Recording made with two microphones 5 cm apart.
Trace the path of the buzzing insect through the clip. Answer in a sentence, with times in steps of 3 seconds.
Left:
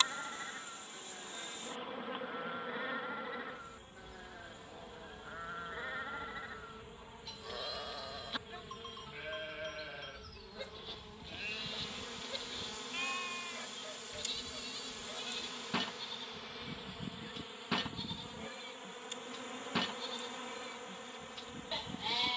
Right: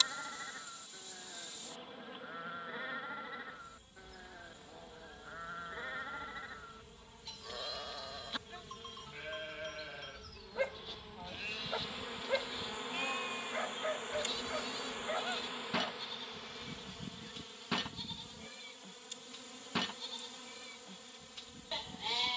You can hear the buzzing insect on the left from 0 s, in the centre from 9 s, on the right from 12 s, in the centre from 15 s and on the left from 18 s.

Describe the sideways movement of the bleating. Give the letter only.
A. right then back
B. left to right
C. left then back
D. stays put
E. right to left
D.